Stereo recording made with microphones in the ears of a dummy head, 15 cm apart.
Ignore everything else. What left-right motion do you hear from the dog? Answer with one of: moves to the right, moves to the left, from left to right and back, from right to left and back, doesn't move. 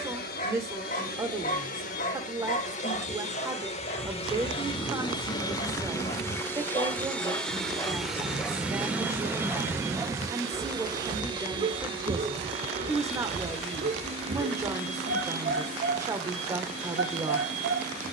moves to the right.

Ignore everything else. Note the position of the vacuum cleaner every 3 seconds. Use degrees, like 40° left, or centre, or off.
60° left, 30° left, centre, 20° right, 40° right, 50° right.